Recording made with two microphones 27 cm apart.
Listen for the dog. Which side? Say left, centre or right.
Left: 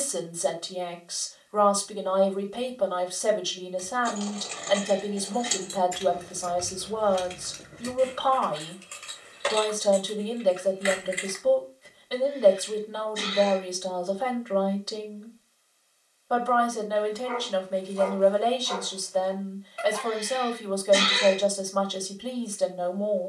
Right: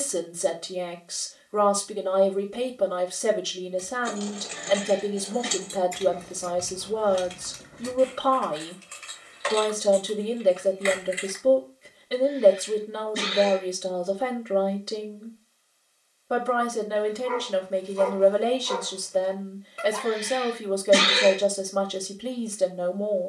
right.